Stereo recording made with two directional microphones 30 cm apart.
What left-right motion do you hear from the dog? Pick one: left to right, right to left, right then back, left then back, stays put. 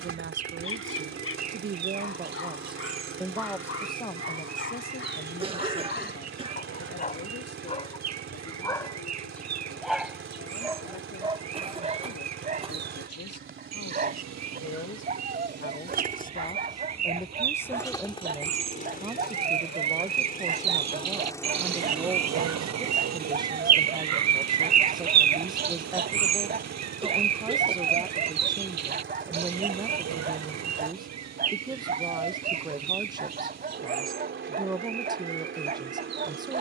left to right.